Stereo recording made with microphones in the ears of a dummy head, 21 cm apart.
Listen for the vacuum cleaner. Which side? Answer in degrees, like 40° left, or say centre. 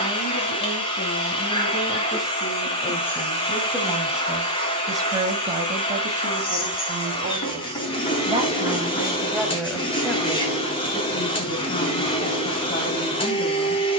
20° left.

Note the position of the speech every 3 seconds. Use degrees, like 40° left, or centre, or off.
20° left, 10° right, 30° right, 10° left, 30° left.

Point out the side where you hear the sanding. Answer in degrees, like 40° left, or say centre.
20° left.